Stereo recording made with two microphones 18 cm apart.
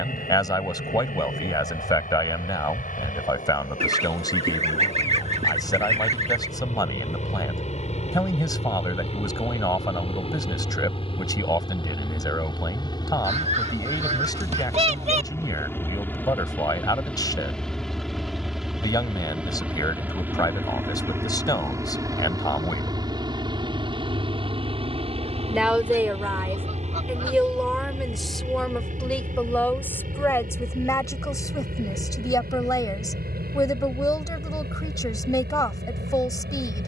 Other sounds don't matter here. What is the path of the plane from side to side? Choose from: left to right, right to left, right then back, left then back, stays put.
left to right.